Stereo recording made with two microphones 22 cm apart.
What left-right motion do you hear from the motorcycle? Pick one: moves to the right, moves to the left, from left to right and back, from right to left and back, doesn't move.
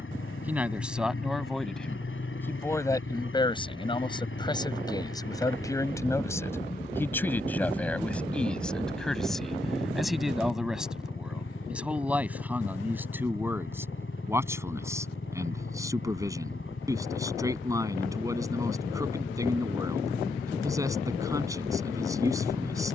doesn't move.